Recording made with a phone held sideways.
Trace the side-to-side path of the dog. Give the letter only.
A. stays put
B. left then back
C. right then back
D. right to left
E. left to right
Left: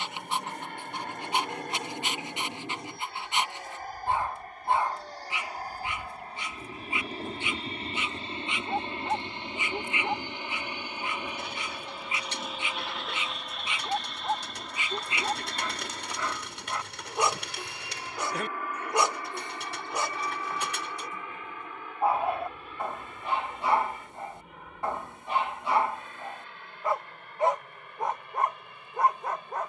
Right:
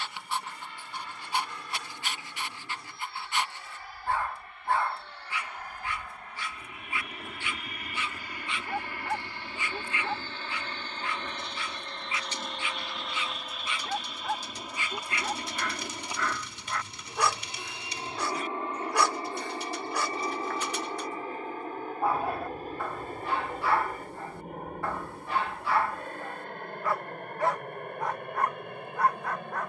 A.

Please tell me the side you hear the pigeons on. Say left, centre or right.
left.